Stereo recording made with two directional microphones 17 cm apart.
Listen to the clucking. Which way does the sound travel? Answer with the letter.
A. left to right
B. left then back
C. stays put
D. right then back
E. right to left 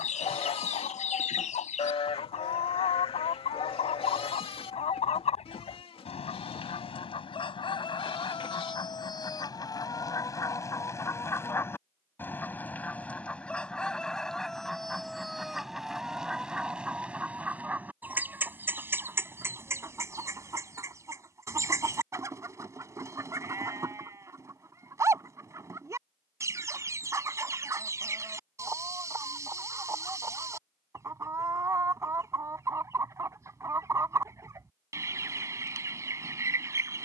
A.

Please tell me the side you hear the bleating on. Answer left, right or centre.
left.